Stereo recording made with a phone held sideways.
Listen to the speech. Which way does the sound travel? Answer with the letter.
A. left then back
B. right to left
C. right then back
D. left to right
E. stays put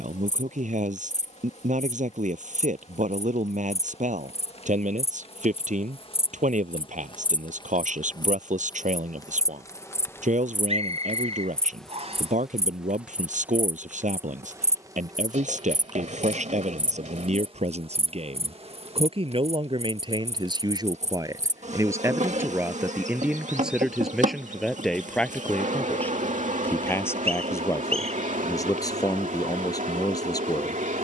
B.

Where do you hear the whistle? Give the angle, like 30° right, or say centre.
50° right.